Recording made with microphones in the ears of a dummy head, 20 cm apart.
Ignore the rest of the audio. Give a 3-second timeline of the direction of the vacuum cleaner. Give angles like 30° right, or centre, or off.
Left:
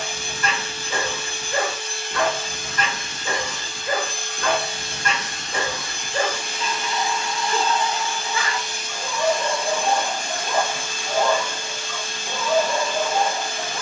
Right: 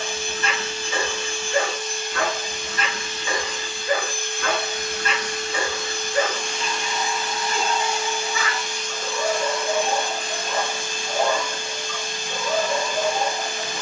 50° left, 30° left, centre, 40° left, 40° left.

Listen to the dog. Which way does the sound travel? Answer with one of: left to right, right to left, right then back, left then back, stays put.
stays put.